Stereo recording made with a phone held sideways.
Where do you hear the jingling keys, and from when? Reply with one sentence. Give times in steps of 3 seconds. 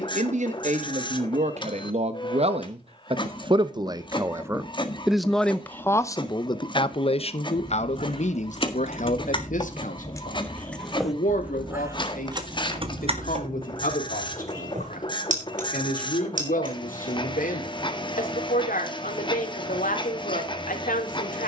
You can hear the jingling keys not at all from 0 s, on the left from 6 s, in the centre from 9 s, on the right from 12 s and not at all from 18 s.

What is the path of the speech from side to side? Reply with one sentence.
You can hear the speech move to the left.